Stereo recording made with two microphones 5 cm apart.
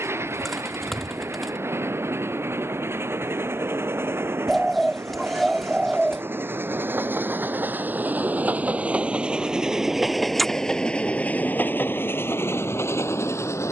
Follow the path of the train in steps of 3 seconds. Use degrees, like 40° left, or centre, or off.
60° right, 60° right, 40° right, 10° left, 60° left.